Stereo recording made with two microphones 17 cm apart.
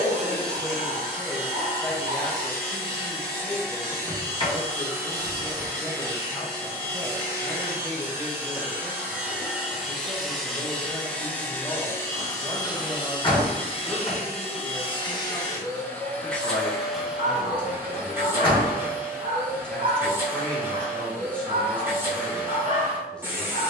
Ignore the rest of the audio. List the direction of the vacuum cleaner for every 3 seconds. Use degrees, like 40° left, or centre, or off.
20° right, 20° right, 20° right, centre, 30° left, 10° left, 10° right, 10° right.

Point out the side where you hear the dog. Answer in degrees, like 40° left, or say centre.
50° right.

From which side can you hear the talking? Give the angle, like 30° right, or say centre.
10° left.